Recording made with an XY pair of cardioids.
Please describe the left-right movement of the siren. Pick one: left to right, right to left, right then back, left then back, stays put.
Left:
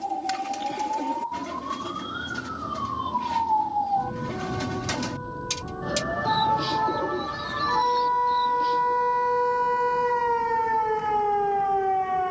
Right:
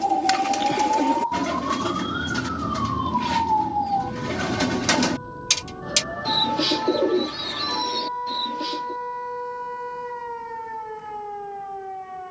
right to left.